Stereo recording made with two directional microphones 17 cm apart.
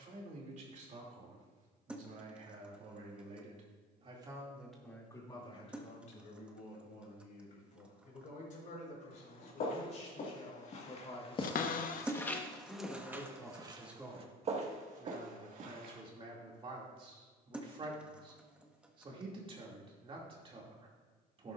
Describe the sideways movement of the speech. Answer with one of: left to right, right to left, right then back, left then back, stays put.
left then back.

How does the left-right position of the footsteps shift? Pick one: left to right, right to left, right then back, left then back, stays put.
left to right.